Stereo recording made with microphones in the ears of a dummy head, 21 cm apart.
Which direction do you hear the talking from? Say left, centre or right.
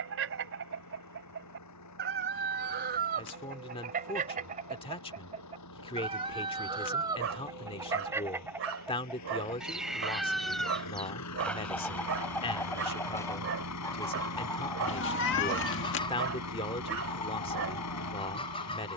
left.